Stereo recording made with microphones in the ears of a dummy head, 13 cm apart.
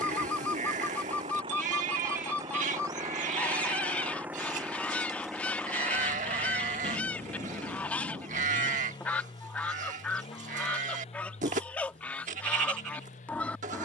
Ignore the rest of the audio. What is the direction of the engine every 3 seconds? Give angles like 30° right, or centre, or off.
30° right, 10° right, 20° left, 40° left, 50° left.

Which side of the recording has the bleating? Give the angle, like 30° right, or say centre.
50° right.